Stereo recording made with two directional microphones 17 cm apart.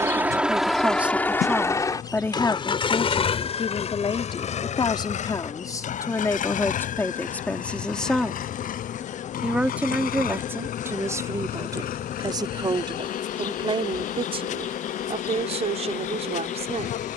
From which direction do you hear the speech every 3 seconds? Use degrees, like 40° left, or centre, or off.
centre, 30° left, 10° left, 10° right, 30° right, 40° right.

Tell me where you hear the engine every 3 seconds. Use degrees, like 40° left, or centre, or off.
10° left, 40° left, 50° left, 60° left, 60° left, 60° left.